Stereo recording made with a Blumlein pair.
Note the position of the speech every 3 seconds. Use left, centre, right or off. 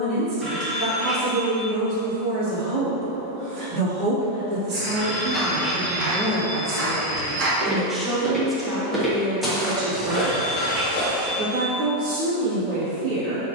right, right, centre, right, right.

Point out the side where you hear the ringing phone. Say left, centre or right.
centre.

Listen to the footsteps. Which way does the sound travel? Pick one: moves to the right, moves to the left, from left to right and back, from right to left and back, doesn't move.
from left to right and back.